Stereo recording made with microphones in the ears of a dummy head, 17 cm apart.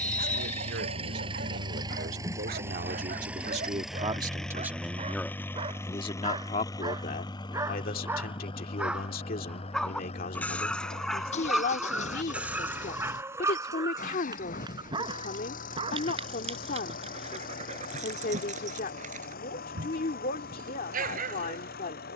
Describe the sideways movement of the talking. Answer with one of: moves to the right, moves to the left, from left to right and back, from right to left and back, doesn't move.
moves to the left.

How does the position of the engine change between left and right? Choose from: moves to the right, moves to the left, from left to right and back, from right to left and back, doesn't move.
moves to the left.